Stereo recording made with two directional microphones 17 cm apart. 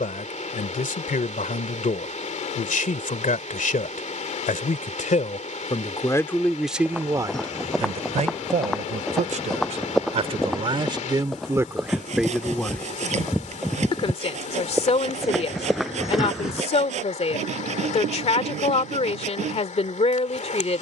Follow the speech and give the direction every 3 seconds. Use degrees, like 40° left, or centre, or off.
50° left, 50° left, 20° right, 30° right, 20° left, 40° left, 40° left.